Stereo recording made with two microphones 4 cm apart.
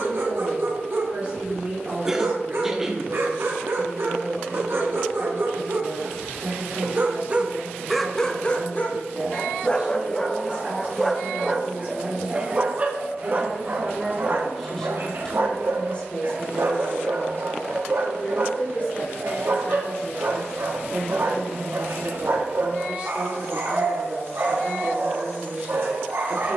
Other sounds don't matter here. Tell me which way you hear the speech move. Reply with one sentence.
You can hear the speech move from right to left and back again.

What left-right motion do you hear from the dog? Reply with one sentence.
In this clip you hear the dog move from right to left and back again.